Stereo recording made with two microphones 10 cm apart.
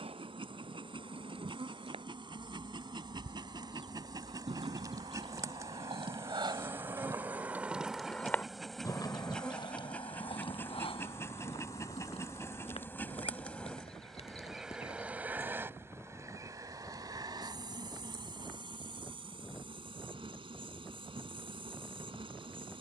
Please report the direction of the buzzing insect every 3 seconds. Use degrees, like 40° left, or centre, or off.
60° right, 40° right, 10° right, 20° left, 10° left, 30° right, 60° right, 60° right.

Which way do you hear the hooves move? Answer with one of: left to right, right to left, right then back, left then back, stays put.
right to left.